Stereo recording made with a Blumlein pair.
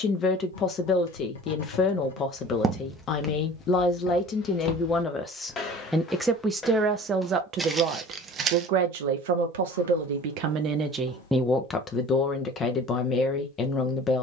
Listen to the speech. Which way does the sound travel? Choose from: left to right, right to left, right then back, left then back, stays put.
right then back.